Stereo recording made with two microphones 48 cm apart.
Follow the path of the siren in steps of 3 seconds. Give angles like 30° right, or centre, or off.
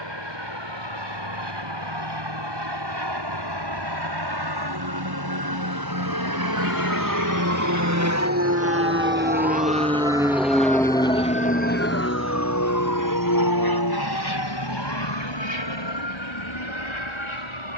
70° right, 50° right, 30° right, 10° left, 40° left, 60° left.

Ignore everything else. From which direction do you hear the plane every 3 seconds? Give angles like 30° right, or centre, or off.
70° right, 60° right, 40° right, centre, 40° left, 60° left.